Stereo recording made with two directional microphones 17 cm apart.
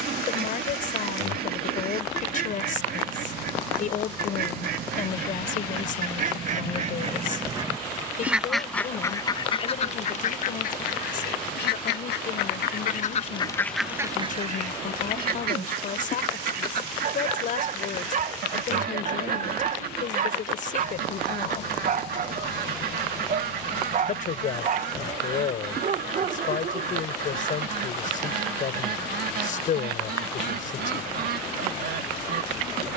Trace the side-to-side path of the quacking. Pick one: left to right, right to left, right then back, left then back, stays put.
left then back.